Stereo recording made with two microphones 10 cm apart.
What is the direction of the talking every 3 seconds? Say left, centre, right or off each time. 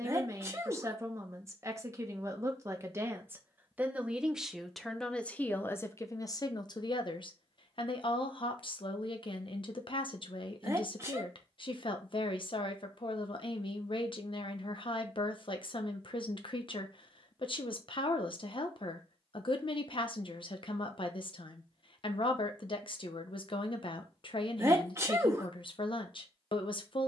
right, centre, left, left, left, left, left, left, left.